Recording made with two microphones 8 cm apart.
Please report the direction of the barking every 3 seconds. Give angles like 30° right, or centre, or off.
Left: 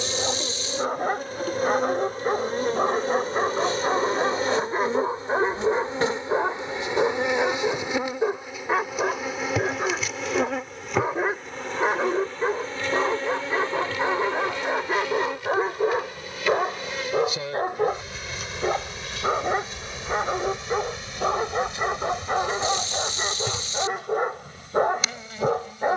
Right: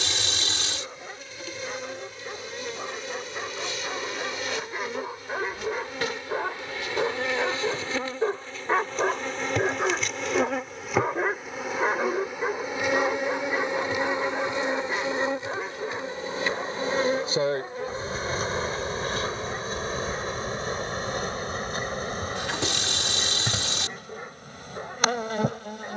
60° left, 40° left, 10° left, centre, 20° left, 40° left, 60° left, 60° left, 60° left.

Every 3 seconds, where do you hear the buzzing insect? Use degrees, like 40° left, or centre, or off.
40° left, 30° left, 20° left, centre, 20° right, 30° right, 40° right, 50° right, 50° right.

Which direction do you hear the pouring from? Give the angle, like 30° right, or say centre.
80° right.